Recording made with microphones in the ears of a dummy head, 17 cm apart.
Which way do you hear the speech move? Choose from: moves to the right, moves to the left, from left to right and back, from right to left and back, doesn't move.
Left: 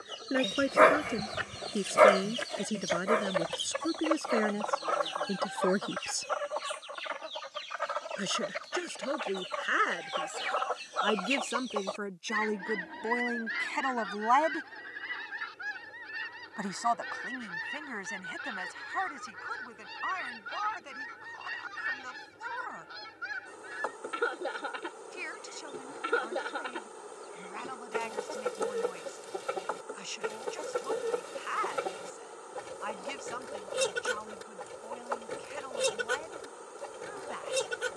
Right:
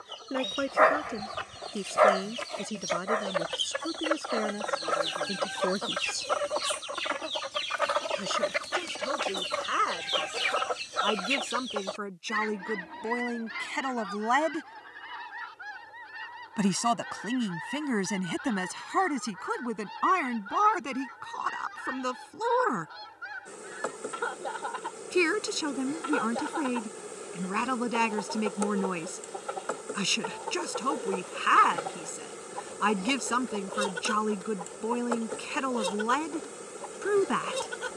moves to the right.